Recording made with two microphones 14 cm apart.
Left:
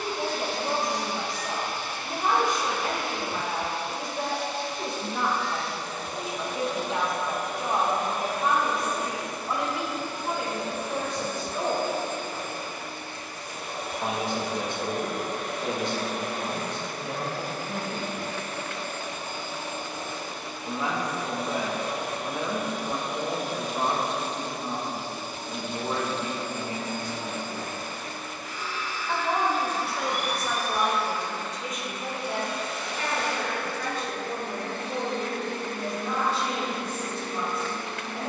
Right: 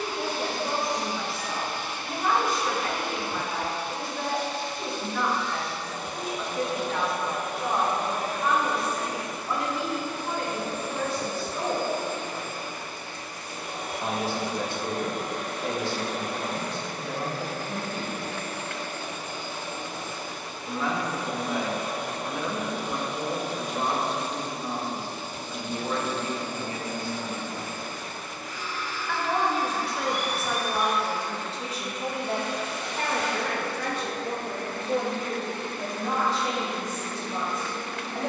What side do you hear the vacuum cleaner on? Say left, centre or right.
left.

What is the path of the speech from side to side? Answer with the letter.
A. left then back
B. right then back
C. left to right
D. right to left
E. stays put
C.